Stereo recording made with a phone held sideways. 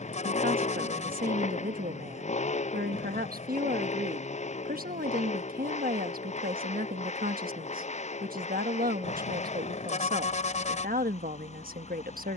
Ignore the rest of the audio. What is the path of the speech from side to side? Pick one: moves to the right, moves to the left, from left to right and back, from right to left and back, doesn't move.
doesn't move.